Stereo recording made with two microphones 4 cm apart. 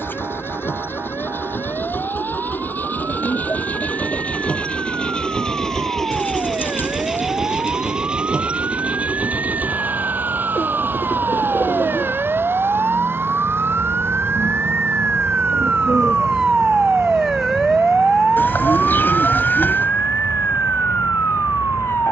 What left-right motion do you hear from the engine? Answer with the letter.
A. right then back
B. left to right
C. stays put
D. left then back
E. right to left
B.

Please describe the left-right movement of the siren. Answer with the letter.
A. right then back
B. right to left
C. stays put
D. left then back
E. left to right
B.